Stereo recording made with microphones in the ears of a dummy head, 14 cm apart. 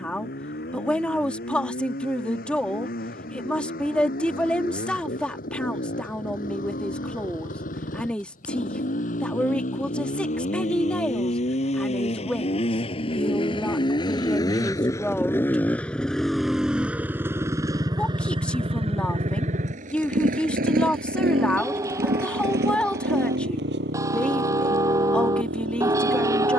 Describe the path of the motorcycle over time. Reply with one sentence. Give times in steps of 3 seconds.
You can hear the motorcycle on the left from 0 s, in the centre from 15 s and on the right from 18 s.